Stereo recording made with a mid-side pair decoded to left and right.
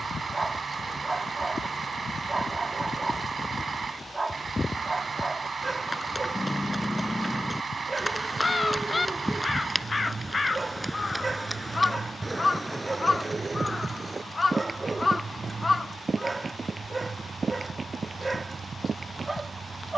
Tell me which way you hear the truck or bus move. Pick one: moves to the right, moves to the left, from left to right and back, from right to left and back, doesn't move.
doesn't move.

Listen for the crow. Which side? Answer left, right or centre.
left.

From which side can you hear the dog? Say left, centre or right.
right.